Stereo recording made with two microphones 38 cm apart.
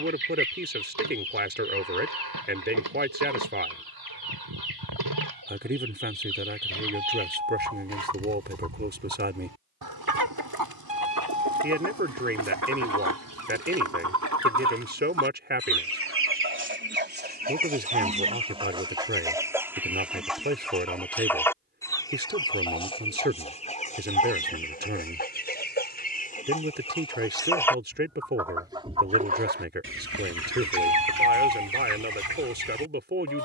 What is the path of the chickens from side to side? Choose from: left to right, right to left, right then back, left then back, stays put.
left then back.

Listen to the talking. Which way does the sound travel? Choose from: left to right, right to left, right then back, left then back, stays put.
stays put.